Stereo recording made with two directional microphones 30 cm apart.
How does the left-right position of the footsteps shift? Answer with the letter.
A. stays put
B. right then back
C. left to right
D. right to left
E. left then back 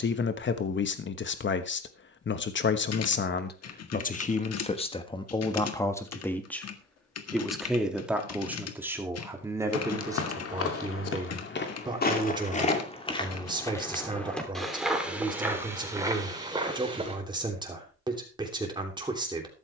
C.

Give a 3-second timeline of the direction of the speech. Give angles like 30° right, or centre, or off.
40° left, 20° left, centre, 10° right, 10° right, 10° right, 10° right.